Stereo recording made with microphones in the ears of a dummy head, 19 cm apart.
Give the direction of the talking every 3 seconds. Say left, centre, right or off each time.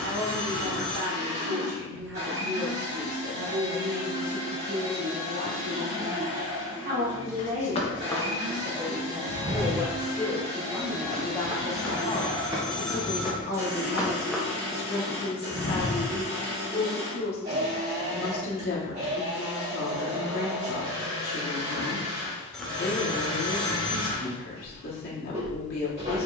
right, right, right, centre, left, left, left, left, left.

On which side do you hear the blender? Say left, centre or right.
right.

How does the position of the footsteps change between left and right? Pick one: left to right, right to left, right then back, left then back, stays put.
right then back.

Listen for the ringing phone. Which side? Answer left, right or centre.
centre.